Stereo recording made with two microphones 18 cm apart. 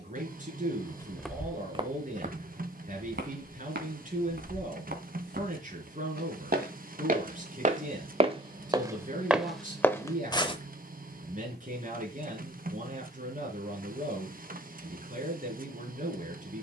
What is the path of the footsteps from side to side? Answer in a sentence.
In this clip you hear the footsteps go right and come back.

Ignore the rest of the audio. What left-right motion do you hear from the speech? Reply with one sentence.
In this clip you hear the speech stay in one place.